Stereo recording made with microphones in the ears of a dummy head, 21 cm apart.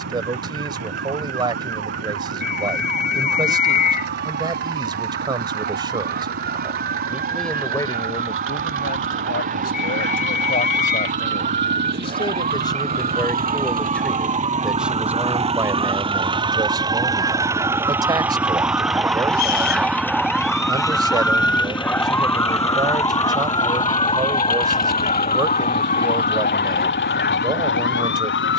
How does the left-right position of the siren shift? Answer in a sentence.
You can hear the siren travel towards the left.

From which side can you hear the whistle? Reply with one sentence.
You can hear the whistle on the left.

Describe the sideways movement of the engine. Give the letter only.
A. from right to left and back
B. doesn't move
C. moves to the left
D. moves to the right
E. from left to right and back
C.